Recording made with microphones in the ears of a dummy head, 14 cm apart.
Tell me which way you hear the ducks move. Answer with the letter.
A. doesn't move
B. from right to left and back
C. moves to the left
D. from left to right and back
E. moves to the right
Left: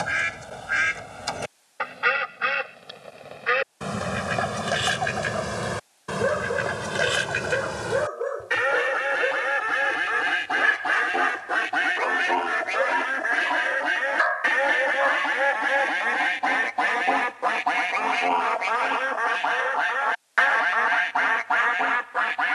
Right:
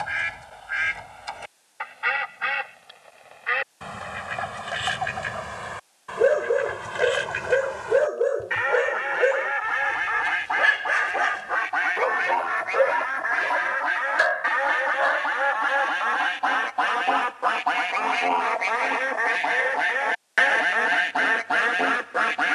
E.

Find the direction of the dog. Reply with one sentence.
In this clip you hear the dog on the right.